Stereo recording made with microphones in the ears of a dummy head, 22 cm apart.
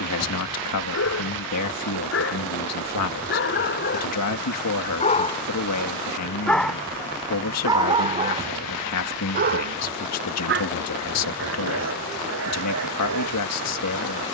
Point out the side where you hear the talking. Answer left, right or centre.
left.